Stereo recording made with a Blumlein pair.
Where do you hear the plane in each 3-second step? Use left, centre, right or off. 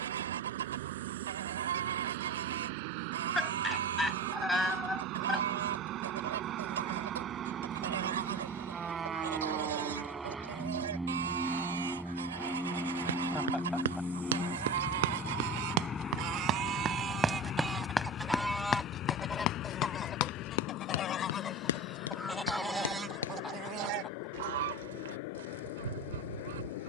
right, right, right, centre, centre, left, left, left, left.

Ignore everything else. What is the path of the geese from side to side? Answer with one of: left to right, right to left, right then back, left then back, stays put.
left then back.